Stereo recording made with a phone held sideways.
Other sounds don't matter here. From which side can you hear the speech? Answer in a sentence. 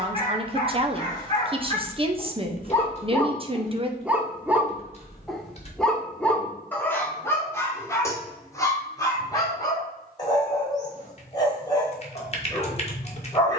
In this clip you hear the speech on the right.